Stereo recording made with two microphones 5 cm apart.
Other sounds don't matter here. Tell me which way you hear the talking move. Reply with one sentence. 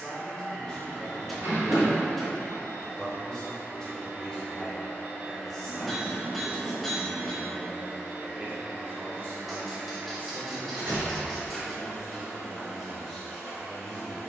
You can hear the talking go right and come back.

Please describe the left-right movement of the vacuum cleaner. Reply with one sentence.
You can hear the vacuum cleaner stay in one place.